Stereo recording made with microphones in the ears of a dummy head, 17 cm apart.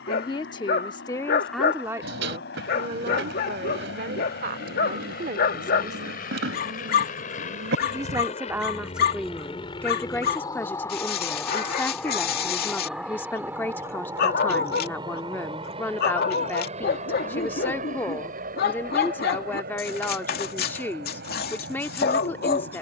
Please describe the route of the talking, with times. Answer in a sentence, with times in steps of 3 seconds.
In this clip you hear the talking in the centre from 0 s, on the right from 3 s and in the centre from 6 s.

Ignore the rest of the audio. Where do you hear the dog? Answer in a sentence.
You can hear the dog on the left.